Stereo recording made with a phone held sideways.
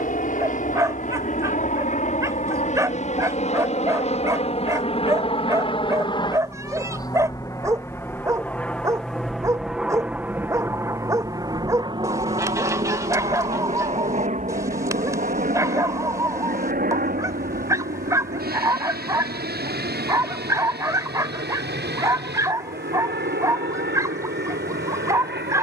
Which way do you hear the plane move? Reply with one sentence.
In this clip you hear the plane go from the left side to the right.